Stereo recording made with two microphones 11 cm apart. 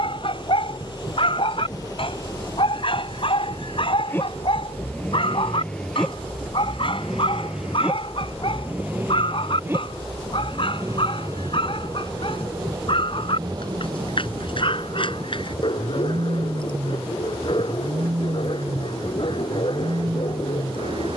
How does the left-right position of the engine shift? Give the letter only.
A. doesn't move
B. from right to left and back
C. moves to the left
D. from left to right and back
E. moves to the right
E.